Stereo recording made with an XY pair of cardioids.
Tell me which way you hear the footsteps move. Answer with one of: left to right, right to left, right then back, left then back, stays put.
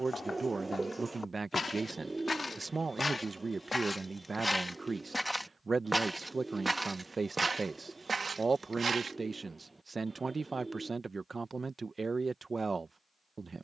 left to right.